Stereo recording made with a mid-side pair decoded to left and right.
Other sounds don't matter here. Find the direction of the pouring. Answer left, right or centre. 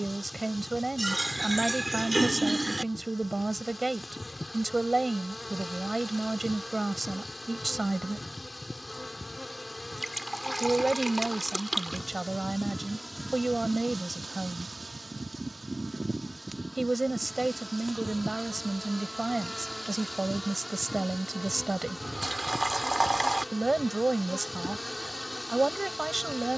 centre.